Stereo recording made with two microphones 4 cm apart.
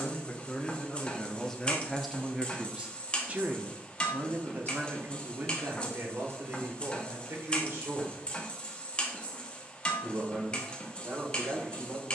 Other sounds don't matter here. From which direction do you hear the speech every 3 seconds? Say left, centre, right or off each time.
centre, right, right, right.